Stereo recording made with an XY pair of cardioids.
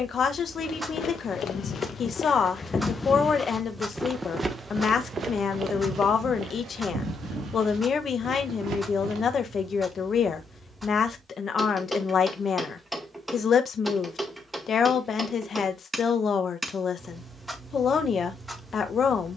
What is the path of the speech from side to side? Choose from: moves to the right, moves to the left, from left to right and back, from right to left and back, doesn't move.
doesn't move.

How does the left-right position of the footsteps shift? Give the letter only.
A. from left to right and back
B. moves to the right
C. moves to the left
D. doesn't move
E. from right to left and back
B.